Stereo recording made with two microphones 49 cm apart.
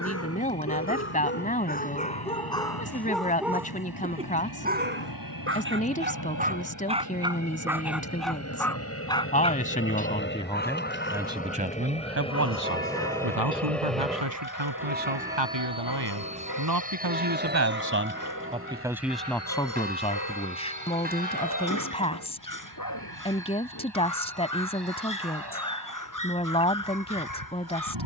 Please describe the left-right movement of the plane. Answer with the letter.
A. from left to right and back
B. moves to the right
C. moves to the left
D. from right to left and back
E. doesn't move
B.